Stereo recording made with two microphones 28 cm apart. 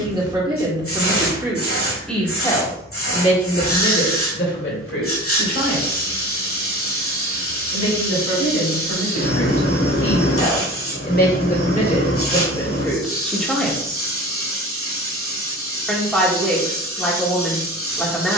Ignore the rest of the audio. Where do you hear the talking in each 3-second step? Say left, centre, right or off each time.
centre, left, left, left, centre, centre.